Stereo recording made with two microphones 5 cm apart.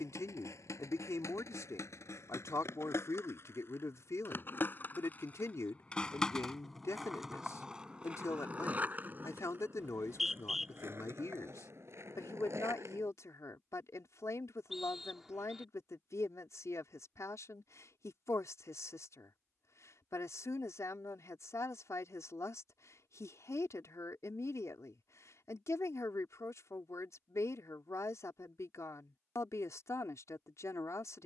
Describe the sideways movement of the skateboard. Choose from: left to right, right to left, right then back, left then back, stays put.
left to right.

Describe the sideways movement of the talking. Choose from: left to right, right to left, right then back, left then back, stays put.
stays put.